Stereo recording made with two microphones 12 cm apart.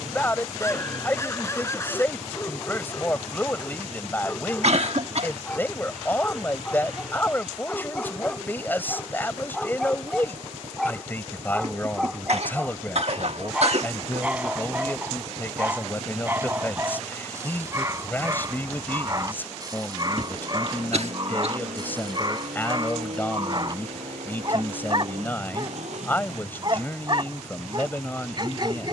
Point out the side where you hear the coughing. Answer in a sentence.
In this clip you hear the coughing on the right.